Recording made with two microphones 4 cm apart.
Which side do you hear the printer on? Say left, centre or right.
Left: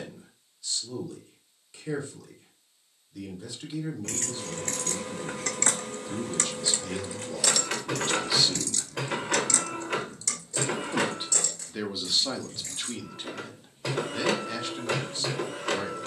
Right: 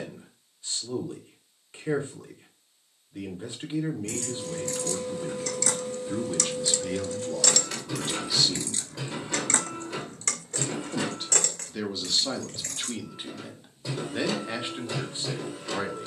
left.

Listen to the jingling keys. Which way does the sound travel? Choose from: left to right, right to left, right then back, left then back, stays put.
left to right.